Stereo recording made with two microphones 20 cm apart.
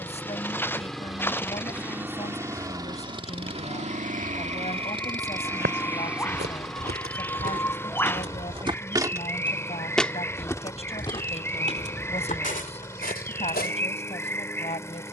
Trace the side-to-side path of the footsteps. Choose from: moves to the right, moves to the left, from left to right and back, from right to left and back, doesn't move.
moves to the left.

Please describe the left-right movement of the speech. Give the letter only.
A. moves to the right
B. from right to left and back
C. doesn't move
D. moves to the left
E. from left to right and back
C.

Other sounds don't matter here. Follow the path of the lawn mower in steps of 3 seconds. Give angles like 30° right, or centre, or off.
10° right, 30° right, 10° left, 10° left, 10° left.